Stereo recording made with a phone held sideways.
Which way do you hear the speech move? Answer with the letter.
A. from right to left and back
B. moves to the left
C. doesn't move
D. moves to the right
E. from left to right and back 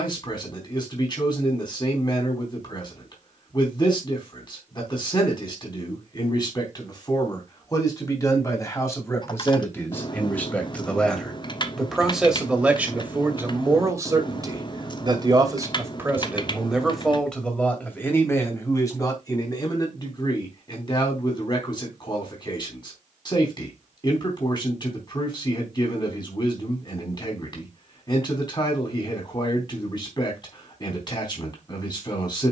E.